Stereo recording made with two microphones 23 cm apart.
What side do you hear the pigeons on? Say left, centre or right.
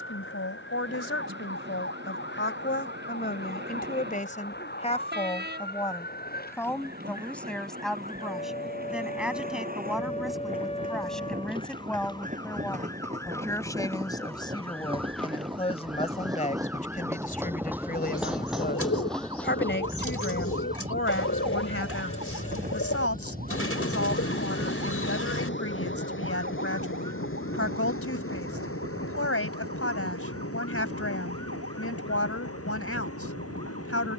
left.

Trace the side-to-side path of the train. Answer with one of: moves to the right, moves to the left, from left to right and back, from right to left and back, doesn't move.
moves to the left.